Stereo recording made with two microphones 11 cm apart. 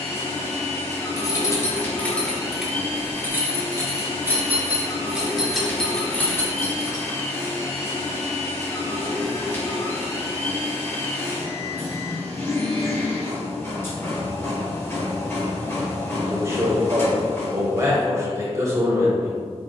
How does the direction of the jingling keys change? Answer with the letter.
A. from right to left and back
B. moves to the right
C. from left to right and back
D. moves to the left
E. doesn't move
C.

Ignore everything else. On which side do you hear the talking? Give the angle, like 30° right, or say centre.
30° right.